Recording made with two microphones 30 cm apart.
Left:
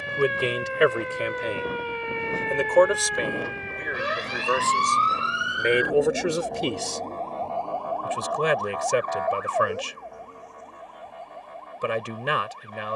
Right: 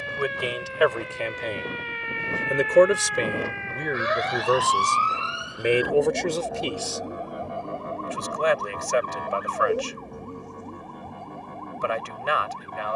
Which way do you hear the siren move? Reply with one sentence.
In this clip you hear the siren travel towards the right.